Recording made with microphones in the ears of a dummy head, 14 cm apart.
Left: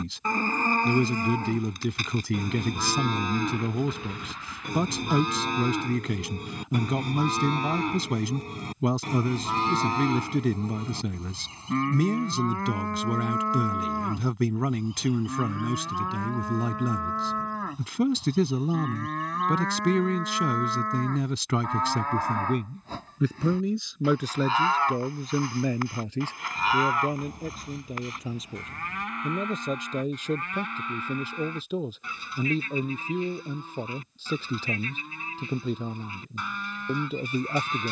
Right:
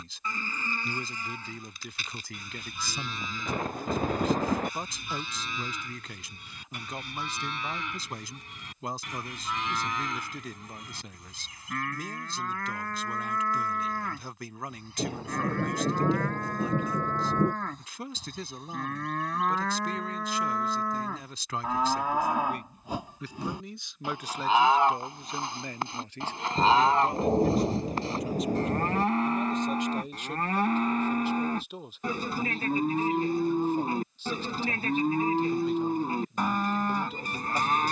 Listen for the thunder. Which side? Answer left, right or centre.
right.